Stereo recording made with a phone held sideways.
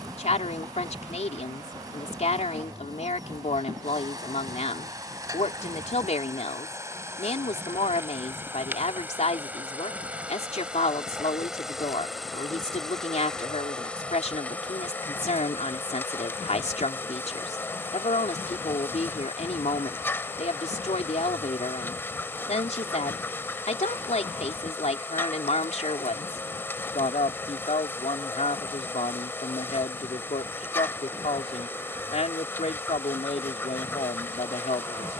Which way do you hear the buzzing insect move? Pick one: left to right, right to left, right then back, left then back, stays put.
right to left.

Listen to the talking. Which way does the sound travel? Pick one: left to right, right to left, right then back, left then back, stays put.
stays put.